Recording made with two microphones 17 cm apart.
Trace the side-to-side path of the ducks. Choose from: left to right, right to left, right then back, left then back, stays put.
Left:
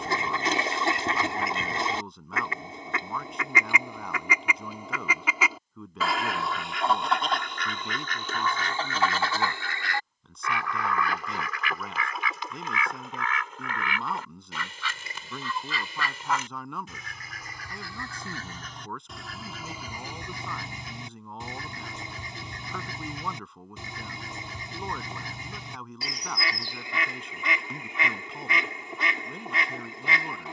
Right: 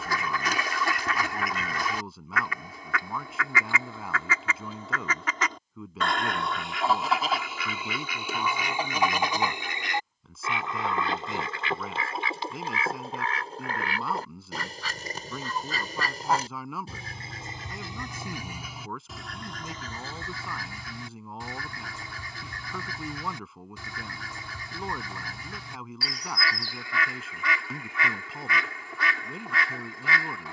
right then back.